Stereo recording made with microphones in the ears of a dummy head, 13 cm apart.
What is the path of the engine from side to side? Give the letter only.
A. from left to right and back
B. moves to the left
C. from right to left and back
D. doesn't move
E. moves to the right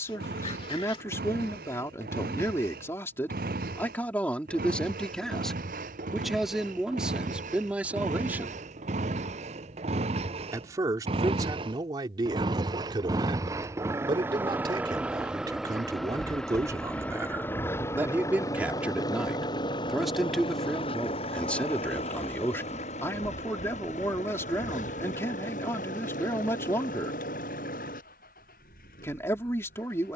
B.